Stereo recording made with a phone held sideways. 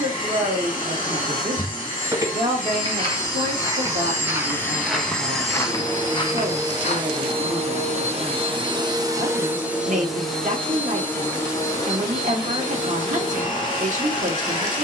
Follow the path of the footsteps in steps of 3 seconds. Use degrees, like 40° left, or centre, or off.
20° right, 10° right, 40° left, off, off.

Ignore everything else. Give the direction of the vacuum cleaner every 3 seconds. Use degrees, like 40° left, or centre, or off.
30° left, 10° left, 30° right, centre, 30° left.